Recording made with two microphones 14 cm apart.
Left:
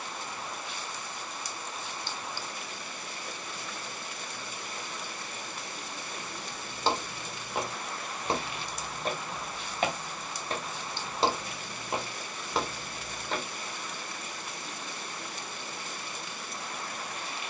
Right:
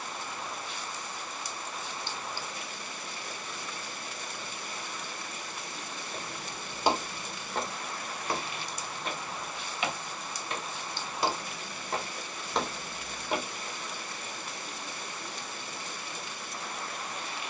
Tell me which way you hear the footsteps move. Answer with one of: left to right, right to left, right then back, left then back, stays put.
left then back.